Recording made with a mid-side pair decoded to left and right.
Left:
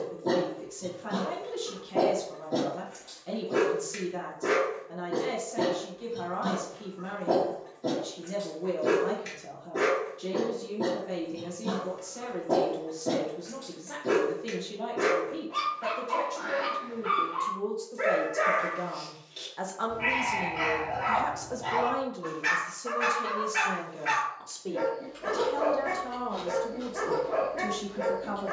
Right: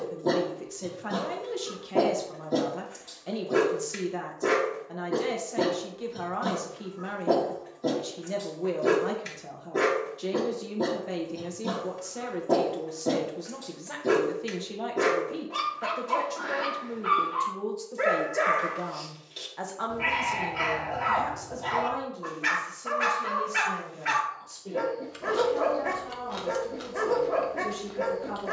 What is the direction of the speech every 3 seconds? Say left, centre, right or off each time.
right, right, right, right, right, right, centre, left, left, left.